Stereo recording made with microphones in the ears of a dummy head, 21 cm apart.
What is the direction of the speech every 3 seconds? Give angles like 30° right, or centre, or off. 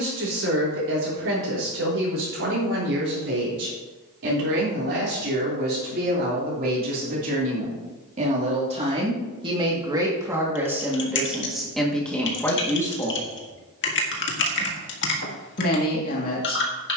60° right, 50° right, 30° right, 10° right, 10° left, 40° left.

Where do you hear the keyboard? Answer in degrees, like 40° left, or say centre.
50° left.